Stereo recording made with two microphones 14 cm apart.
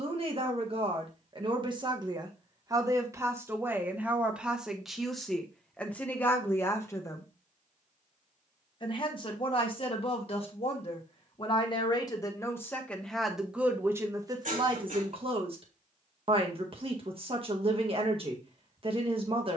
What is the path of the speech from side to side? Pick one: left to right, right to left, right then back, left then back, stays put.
left then back.